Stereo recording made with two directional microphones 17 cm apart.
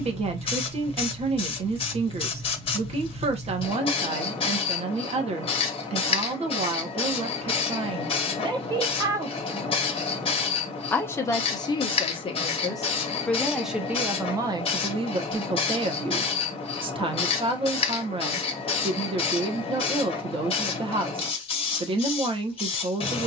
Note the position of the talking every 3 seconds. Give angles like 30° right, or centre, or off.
40° right, 40° right, 30° right, 10° left, centre, 30° right, 30° right, 30° right.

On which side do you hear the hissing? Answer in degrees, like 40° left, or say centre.
30° left.